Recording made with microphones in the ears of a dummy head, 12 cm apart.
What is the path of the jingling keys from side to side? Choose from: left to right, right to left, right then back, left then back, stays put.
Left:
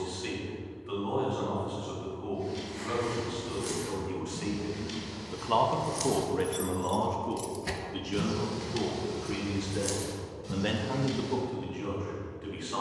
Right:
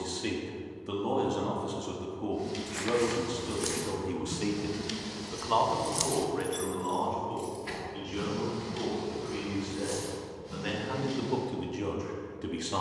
right to left.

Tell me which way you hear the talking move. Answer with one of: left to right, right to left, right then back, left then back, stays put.
left then back.